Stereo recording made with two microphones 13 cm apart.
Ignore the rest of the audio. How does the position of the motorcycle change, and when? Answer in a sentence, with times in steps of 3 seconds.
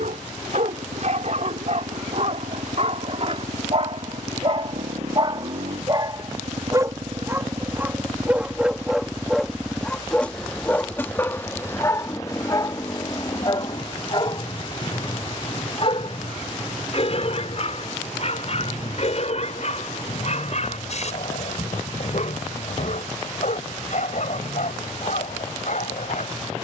You can hear the motorcycle on the right from 0 s, in the centre from 9 s and on the left from 12 s.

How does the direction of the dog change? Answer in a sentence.
In this clip you hear the dog move to the left.